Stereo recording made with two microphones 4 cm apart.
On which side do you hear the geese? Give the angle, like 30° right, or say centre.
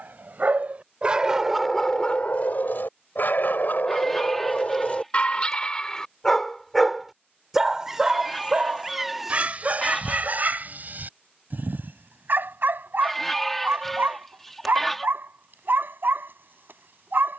10° left.